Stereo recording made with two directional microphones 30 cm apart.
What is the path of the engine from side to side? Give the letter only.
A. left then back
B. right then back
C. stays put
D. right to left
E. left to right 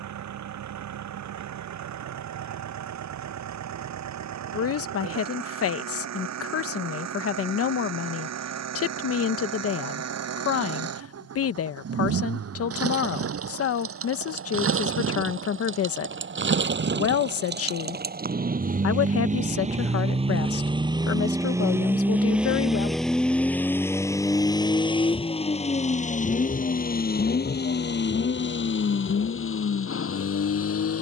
D.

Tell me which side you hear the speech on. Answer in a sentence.
You can hear the speech on the left.